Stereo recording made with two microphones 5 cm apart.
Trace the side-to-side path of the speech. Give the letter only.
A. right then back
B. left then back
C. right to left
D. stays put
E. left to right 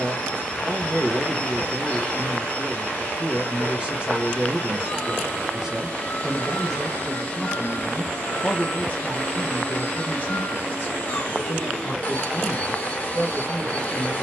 C.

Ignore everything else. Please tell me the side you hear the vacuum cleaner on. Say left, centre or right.
left.